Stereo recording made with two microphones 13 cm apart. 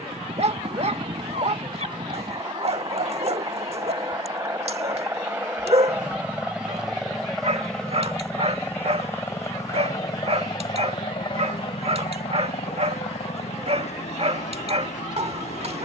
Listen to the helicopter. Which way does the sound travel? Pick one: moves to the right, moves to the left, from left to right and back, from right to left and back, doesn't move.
moves to the left.